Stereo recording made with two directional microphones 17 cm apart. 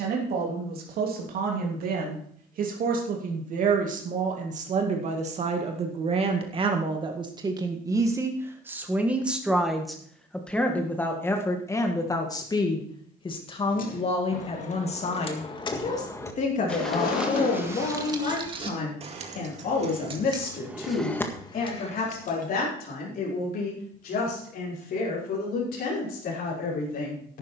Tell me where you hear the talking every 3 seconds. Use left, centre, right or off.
right, right, right, centre, left, left, left, left, left.